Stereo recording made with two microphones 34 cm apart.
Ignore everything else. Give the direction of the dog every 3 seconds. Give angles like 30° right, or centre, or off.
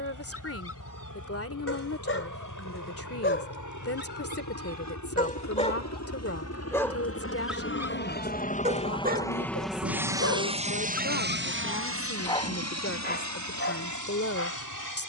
40° left, 30° left, 10° right, 30° right, 30° left.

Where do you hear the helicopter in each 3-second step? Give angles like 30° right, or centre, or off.
70° left, 60° left, 40° left, 20° right, 50° right.